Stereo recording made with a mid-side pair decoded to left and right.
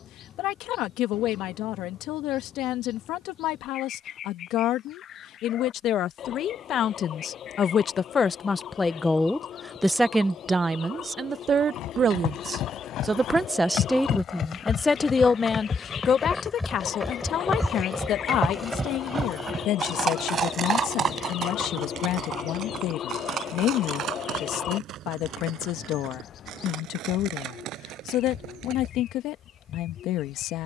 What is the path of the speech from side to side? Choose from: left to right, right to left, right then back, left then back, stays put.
right then back.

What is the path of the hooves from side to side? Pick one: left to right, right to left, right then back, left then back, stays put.
left to right.